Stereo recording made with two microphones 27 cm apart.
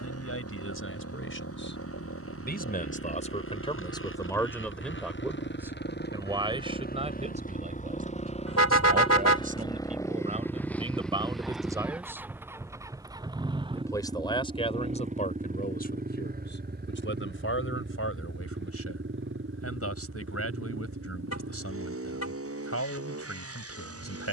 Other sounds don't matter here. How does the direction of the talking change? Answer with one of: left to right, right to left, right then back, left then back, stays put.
right then back.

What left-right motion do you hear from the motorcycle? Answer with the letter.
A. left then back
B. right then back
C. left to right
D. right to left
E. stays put
C.